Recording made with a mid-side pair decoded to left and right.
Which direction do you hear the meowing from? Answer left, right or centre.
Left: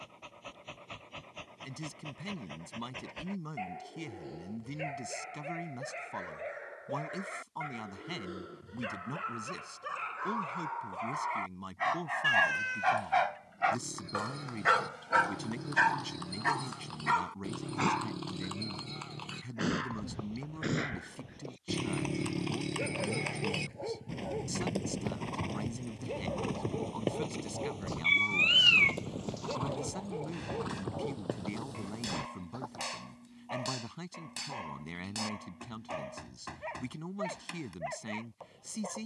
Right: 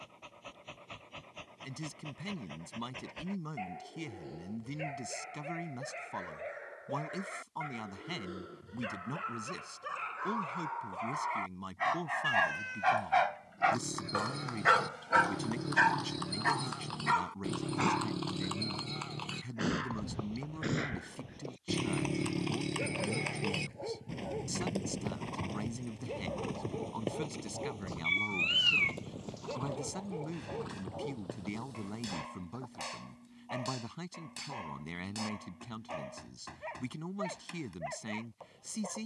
left.